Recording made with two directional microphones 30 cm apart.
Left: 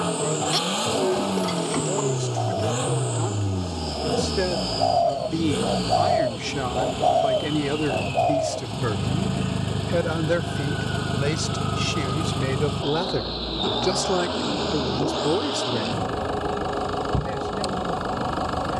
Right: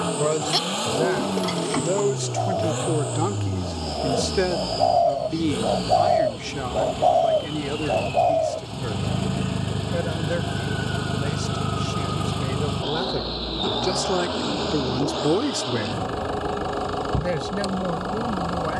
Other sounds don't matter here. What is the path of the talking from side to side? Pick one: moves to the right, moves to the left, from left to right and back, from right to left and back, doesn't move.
from right to left and back.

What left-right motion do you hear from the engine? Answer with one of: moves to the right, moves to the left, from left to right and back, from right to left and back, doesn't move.
doesn't move.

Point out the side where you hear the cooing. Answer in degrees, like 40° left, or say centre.
30° right.